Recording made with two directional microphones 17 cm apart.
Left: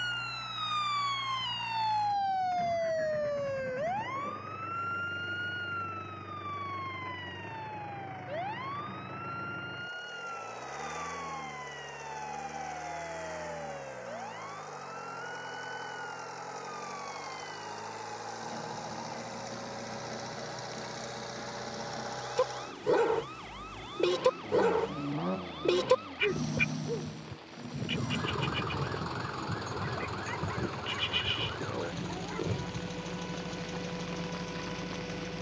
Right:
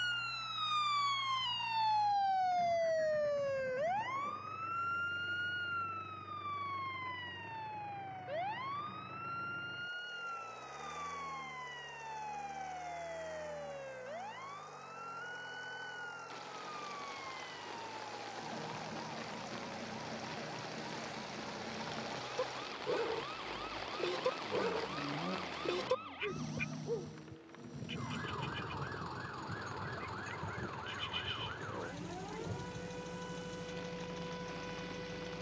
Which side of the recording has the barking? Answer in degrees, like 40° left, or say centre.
60° left.